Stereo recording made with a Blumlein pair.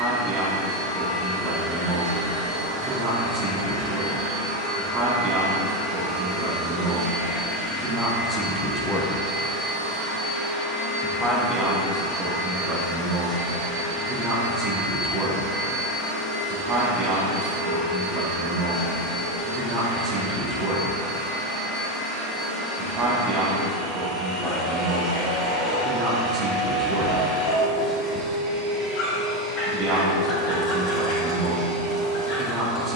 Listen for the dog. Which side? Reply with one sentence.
You can hear the dog on the left.